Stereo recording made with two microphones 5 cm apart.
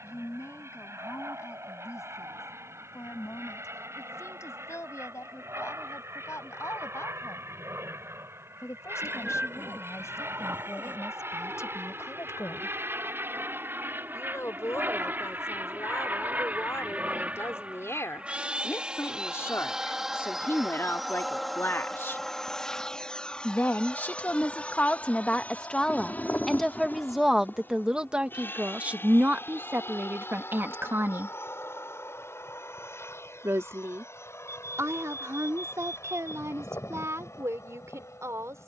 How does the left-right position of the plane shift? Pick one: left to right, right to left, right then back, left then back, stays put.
right to left.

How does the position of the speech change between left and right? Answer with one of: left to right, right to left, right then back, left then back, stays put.
left to right.